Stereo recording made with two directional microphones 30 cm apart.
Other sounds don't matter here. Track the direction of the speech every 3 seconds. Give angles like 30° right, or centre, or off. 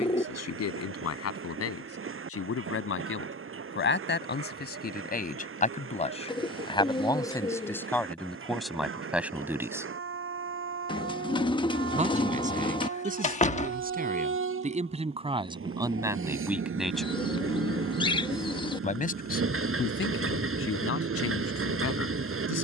50° left, 30° left, 10° left, 10° right, 30° right, 10° right, 40° left, 50° left.